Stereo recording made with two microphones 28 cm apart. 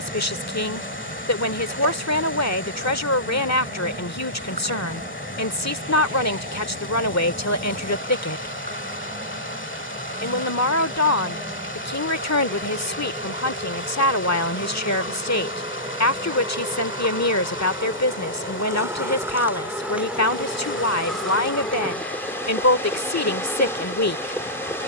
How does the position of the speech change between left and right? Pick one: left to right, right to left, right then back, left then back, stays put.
stays put.